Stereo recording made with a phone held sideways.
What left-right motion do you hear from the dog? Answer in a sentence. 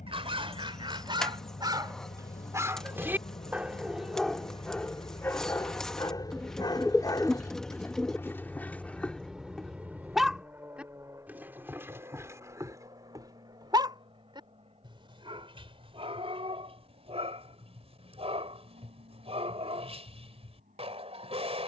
You can hear the dog move from right to left and back again.